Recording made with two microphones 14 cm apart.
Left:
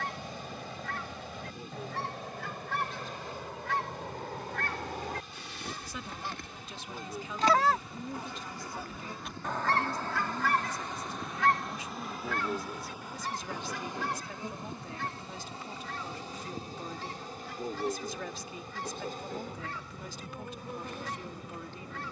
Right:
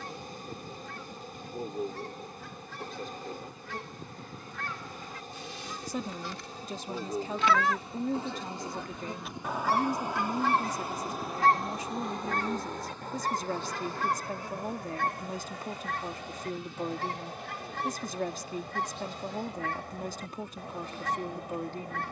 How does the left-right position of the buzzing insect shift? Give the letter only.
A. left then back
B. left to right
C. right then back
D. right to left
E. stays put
D.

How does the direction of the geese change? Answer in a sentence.
In this clip you hear the geese move to the right.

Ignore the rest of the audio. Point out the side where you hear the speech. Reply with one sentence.
You can hear the speech on the right.